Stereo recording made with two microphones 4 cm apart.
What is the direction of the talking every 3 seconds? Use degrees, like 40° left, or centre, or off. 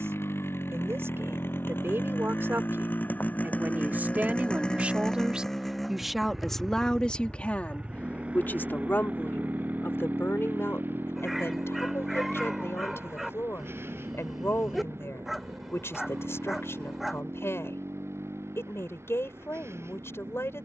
60° right, 30° right, 30° left, 60° left, 70° left, 70° left, 70° left.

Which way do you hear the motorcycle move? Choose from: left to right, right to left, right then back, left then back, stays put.
left to right.